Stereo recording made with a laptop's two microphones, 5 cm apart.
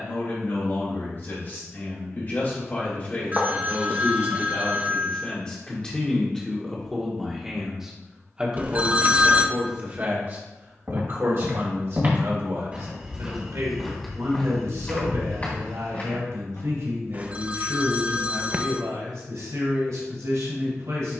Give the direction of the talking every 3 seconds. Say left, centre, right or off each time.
left, left, centre, right, right, right, right.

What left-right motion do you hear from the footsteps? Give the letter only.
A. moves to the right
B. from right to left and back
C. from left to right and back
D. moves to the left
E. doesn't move
D.